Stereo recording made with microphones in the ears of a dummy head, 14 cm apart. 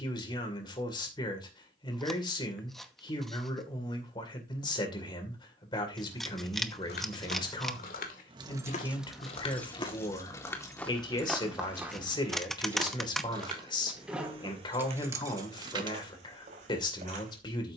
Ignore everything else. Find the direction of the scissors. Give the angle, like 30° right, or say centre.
centre.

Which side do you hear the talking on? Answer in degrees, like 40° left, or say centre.
30° left.